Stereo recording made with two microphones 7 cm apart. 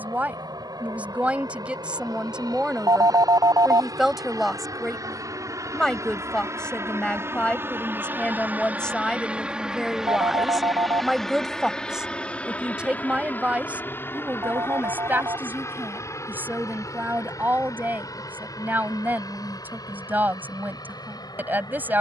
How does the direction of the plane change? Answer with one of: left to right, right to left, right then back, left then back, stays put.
right to left.